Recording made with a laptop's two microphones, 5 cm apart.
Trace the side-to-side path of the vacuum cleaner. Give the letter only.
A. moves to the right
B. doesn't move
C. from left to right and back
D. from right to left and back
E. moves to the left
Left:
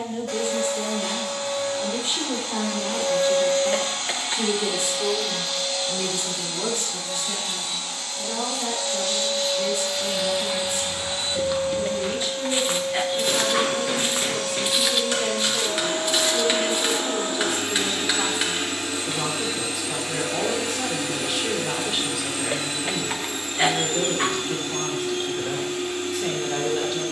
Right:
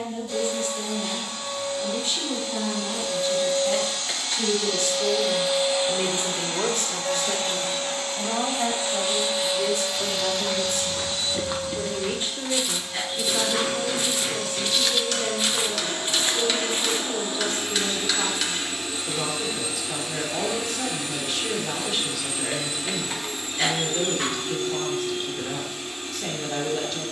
C.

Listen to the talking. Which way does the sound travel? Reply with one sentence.
In this clip you hear the talking go right and come back.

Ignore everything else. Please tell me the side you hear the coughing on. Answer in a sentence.
You can hear the coughing on the left.